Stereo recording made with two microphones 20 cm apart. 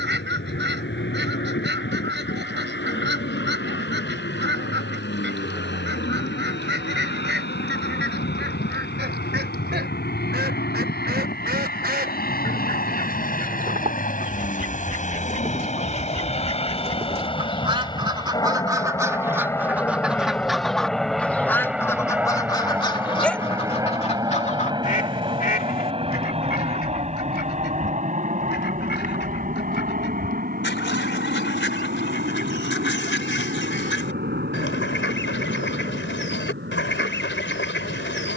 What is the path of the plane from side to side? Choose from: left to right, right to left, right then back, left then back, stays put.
left to right.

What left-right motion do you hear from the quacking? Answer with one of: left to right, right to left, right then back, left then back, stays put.
right to left.